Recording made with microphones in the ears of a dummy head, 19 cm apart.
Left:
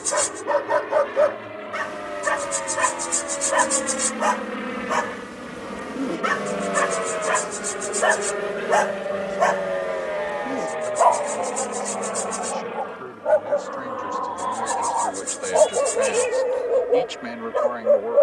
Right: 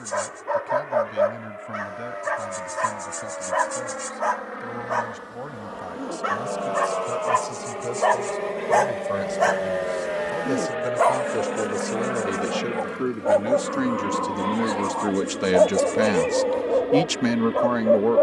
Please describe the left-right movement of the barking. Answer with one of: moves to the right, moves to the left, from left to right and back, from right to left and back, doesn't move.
from left to right and back.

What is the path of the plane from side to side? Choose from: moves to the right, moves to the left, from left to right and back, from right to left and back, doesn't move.
moves to the right.